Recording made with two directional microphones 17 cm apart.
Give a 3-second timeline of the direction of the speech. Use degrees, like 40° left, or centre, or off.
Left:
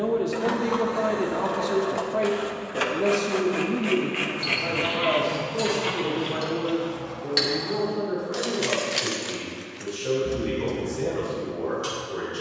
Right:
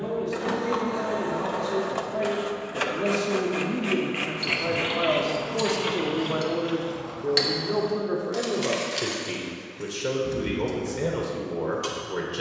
30° left, 10° right, 40° right, 60° right.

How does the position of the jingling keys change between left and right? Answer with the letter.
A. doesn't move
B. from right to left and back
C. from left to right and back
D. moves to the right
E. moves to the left
B.